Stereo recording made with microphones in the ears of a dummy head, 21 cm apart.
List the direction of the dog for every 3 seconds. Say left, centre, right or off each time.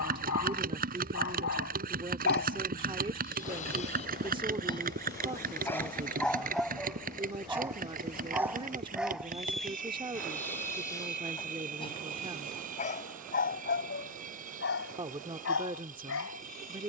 left, left, centre, centre, left, left.